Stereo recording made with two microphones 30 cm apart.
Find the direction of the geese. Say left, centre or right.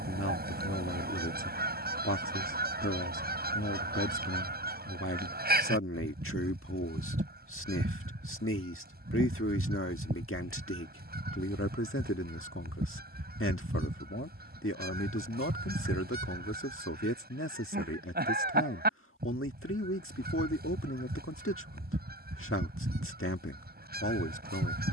right.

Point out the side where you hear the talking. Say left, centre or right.
left.